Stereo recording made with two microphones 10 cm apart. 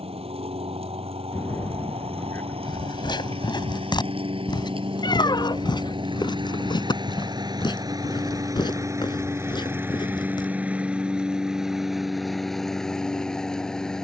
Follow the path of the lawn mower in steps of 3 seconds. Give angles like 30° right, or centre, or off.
80° right, 70° right, 40° right, 20° right, centre.